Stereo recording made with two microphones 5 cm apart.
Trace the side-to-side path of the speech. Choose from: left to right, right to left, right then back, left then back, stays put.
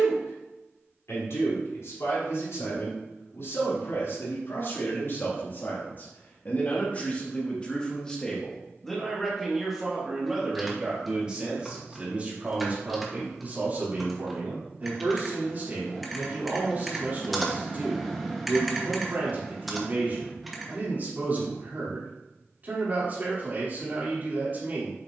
left to right.